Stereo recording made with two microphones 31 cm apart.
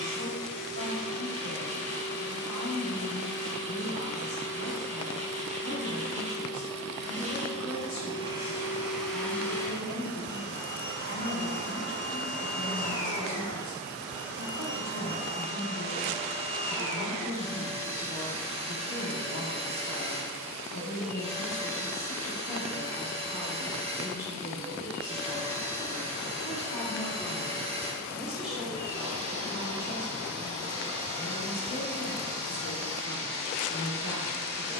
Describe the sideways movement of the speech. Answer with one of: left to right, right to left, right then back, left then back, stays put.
right then back.